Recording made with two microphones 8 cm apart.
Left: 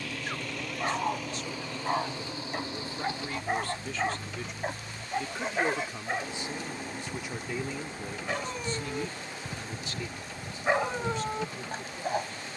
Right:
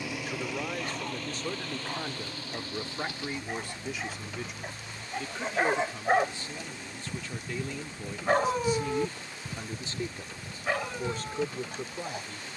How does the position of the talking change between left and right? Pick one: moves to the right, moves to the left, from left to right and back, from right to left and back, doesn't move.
from right to left and back.